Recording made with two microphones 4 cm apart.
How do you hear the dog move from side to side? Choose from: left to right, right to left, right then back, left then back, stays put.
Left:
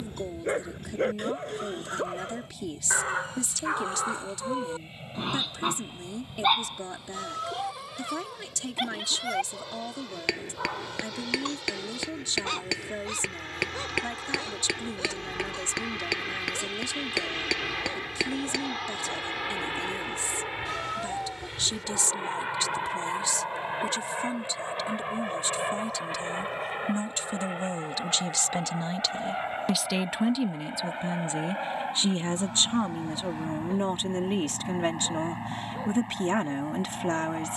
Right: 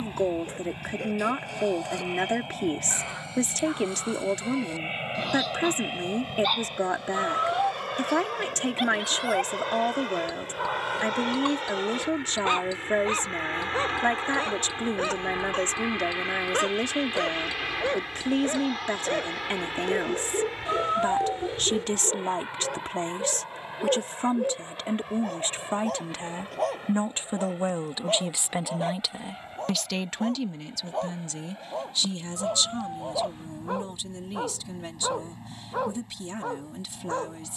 left to right.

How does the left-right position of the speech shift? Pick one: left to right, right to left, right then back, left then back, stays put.
right to left.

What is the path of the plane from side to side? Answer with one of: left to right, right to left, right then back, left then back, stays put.
right to left.